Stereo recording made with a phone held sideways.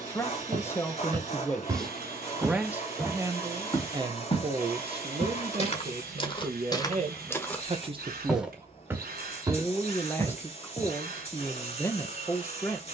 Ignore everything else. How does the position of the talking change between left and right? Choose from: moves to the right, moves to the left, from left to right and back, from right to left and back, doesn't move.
from left to right and back.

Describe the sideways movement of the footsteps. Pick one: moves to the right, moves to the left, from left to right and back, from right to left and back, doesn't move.
from right to left and back.